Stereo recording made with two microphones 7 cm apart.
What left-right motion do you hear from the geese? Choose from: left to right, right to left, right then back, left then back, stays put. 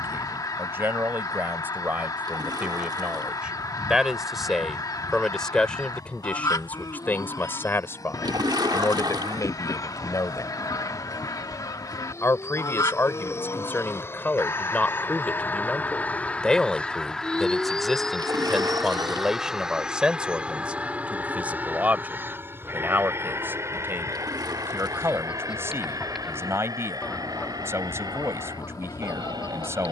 right then back.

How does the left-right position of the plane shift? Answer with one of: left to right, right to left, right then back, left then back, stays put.
left to right.